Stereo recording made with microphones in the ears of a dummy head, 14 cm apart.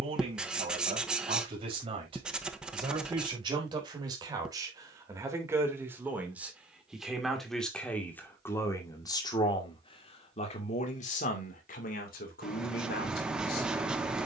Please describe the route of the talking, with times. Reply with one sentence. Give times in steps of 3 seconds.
In this clip you hear the talking on the right from 0 s, in the centre from 6 s and on the left from 9 s.